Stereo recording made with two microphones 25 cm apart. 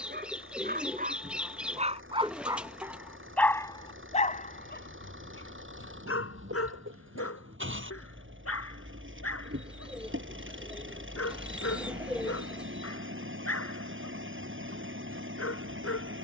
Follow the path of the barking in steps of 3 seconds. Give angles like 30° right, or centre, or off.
30° right, 40° left, 70° left, 80° left, 80° left, 80° left.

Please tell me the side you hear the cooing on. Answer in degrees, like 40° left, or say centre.
centre.